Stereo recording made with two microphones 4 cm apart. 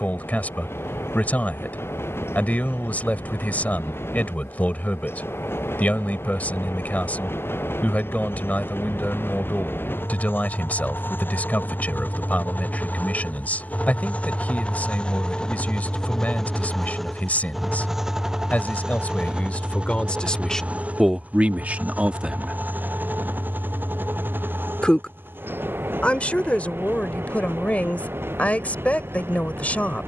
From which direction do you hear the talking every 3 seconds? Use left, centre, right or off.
left, left, left, left, left, left, left, right, left, left.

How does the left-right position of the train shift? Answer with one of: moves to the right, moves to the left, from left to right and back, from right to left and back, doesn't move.
moves to the right.